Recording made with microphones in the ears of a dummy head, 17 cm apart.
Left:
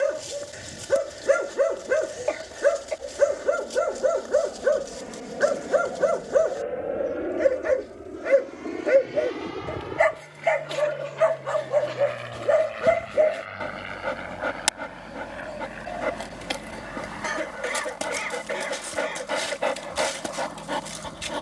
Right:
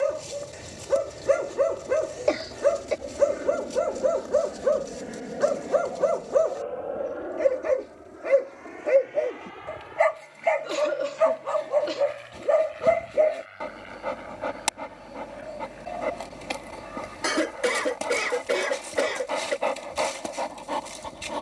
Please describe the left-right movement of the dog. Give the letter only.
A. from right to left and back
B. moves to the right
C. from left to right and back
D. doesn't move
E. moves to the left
D.